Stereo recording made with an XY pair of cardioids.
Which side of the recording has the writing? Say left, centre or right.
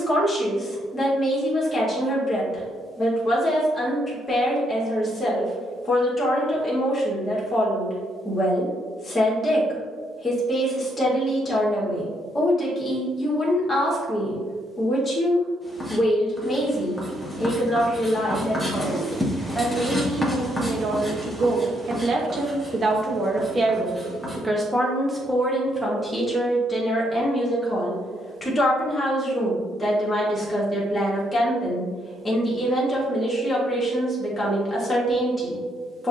centre.